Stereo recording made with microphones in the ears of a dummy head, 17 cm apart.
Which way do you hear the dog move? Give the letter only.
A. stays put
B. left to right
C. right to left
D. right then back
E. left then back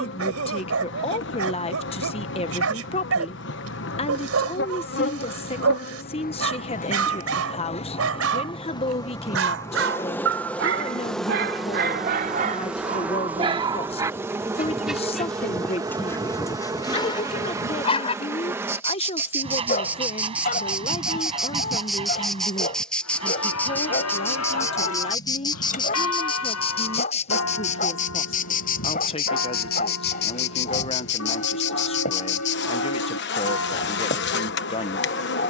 C.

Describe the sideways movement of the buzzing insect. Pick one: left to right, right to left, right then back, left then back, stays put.
right then back.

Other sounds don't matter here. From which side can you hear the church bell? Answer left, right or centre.
left.